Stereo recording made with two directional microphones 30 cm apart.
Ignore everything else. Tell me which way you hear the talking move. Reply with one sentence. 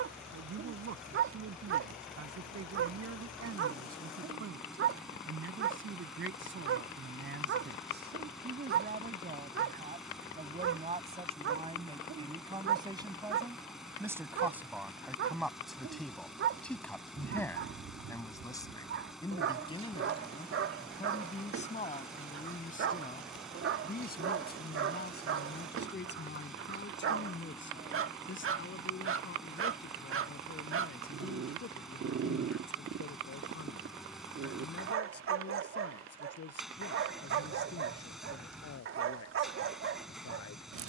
In this clip you hear the talking move to the left.